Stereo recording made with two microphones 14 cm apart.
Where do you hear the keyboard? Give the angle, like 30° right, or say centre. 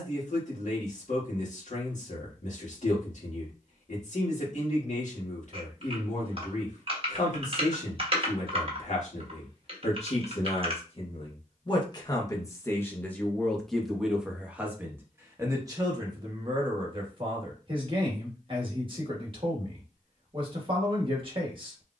40° right.